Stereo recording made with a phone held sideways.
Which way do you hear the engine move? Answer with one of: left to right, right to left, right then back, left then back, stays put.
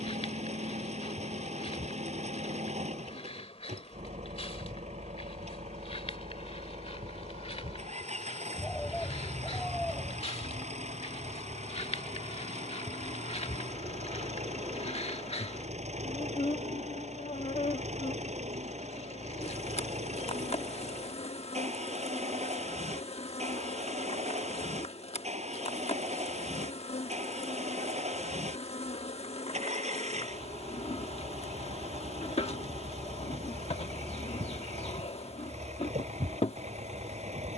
stays put.